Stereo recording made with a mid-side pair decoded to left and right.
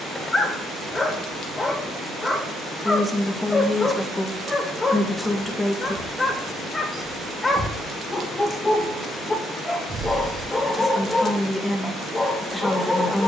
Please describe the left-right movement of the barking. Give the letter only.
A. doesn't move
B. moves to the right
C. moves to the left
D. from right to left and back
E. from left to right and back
A.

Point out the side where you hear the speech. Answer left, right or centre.
centre.